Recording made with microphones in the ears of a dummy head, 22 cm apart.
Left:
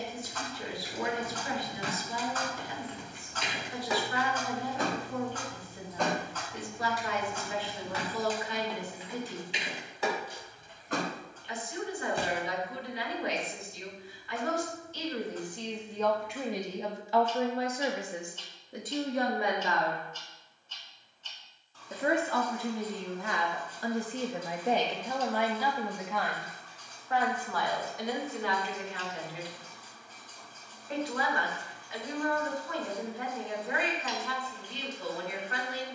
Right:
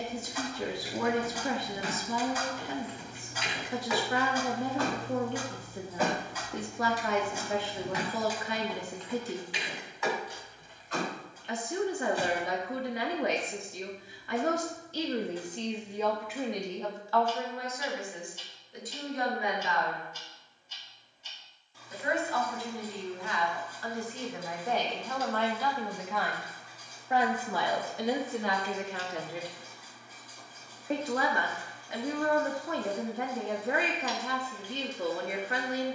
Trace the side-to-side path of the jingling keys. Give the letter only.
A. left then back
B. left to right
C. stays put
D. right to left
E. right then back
E.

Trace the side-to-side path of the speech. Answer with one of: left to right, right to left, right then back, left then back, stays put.
left then back.